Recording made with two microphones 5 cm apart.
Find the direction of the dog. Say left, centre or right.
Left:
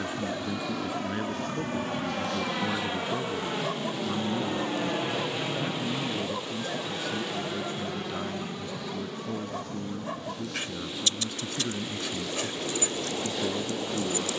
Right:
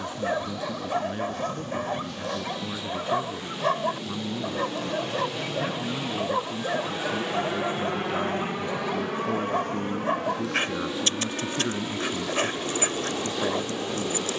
right.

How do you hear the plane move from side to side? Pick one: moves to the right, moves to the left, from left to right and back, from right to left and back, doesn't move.
moves to the right.